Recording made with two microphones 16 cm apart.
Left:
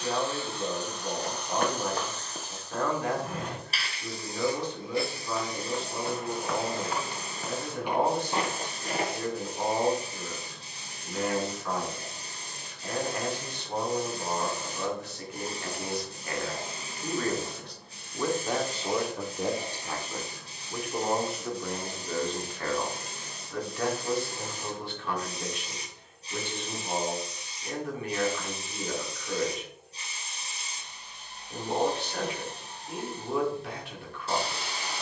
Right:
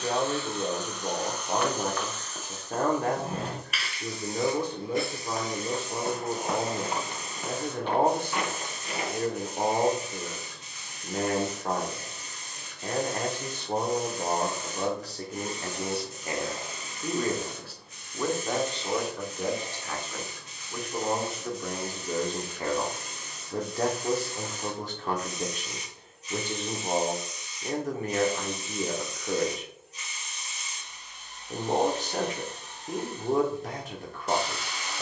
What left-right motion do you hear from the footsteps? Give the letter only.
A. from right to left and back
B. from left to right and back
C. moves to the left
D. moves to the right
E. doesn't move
B.